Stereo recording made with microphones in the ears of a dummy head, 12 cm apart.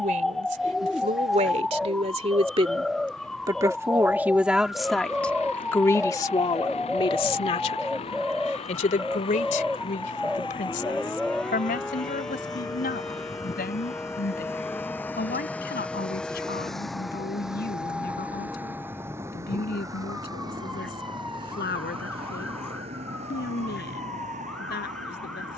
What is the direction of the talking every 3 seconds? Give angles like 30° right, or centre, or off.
50° right, 10° right, 40° left, 60° left, 70° left, 80° left, 80° left, 80° left, 80° left.